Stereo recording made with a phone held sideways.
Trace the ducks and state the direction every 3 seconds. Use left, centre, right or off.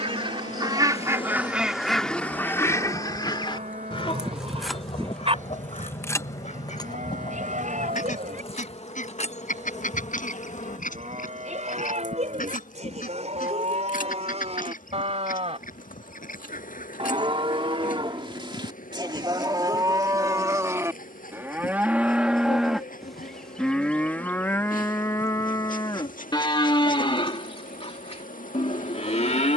centre, left, left, left, left, left, left, left, left, left.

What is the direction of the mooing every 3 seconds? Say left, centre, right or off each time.
right, right, right, right, right, right, right, centre, left, left.